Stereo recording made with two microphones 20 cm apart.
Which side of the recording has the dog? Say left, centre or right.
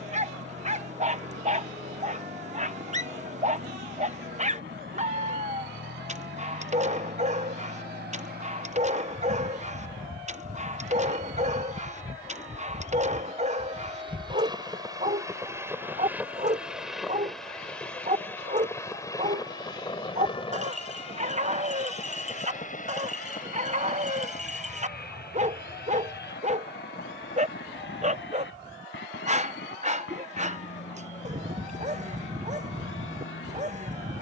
right.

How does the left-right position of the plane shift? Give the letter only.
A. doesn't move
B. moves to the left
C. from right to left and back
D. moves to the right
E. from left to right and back
B.